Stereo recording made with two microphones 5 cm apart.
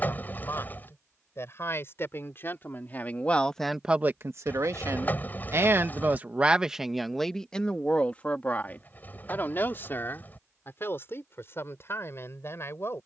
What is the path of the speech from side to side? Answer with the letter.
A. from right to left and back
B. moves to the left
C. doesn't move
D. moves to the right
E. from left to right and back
E.